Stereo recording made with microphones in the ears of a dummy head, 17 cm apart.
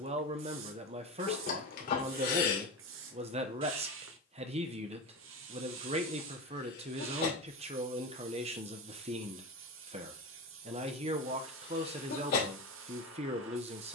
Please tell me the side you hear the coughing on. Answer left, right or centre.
left.